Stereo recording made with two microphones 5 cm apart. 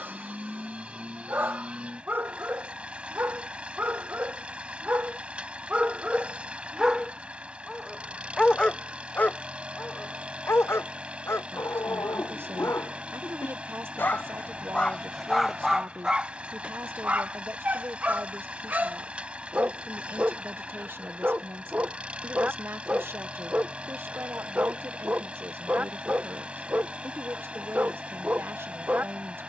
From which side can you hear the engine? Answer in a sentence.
In this clip you hear the engine on the right.